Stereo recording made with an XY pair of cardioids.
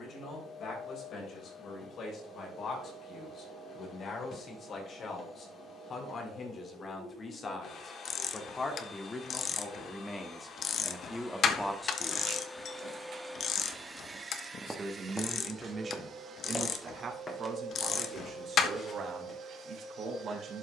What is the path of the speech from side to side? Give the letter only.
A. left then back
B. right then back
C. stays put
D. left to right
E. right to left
D.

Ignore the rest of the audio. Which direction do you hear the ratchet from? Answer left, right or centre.
left.